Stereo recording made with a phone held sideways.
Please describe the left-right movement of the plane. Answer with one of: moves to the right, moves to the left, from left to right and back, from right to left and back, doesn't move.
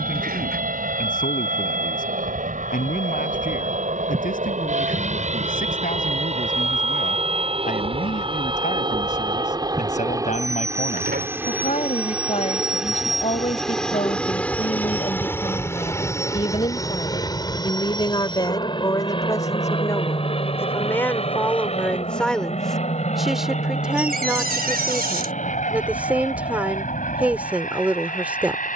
moves to the left.